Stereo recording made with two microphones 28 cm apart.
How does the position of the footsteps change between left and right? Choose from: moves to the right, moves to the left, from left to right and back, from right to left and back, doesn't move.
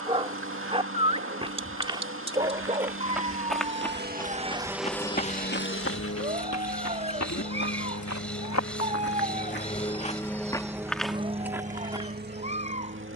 from right to left and back.